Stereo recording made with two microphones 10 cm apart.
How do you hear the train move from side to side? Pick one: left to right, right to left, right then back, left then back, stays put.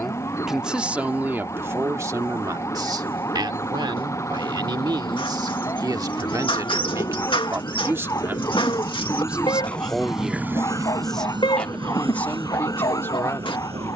left to right.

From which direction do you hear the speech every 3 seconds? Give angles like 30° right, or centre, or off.
20° right, 50° right, 30° right, centre, 20° left.